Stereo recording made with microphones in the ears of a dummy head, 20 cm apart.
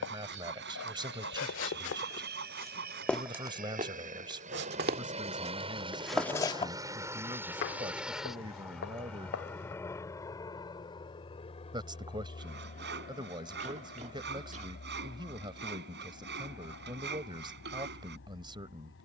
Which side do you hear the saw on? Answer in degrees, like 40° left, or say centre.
50° right.